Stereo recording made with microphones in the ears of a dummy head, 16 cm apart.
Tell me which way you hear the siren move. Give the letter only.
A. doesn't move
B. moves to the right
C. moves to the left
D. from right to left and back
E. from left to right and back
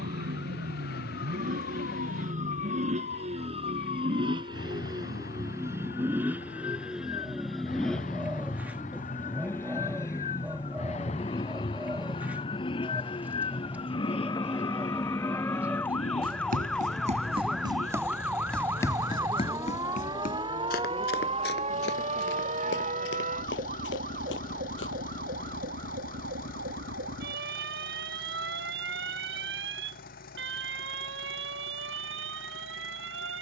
B.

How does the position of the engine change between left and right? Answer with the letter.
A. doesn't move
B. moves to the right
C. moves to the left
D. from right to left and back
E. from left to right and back
C.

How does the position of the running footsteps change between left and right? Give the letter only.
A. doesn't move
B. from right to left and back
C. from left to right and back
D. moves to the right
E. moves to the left
E.